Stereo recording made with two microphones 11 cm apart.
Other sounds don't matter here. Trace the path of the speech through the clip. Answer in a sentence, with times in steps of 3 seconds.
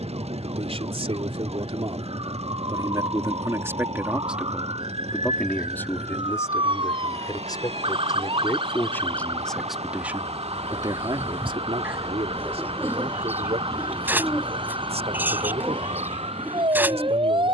In this clip you hear the speech on the right from 0 s, in the centre from 3 s, on the left from 6 s and on the right from 9 s.